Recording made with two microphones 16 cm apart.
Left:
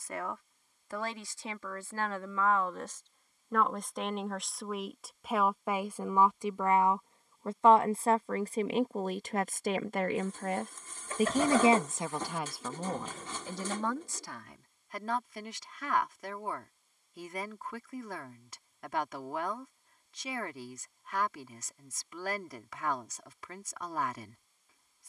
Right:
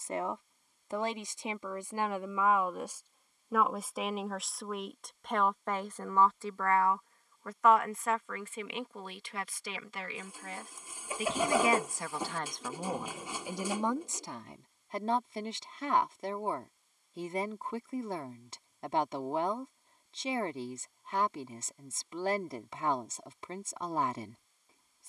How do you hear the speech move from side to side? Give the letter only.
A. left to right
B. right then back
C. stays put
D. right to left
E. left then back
E.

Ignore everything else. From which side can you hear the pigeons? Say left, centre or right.
centre.